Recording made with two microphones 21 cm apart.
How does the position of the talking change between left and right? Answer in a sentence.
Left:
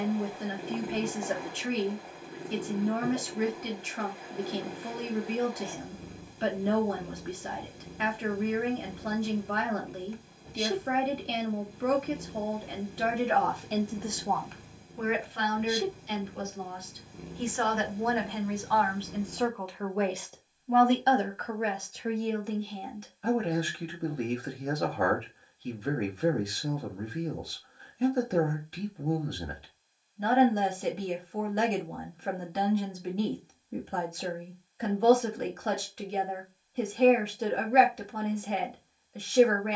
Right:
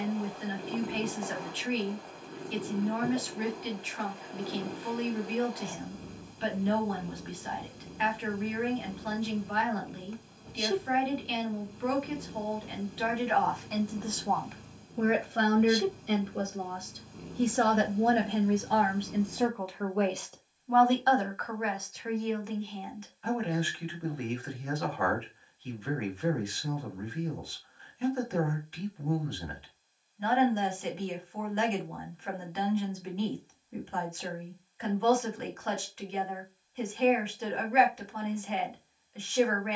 In this clip you hear the talking go right and come back.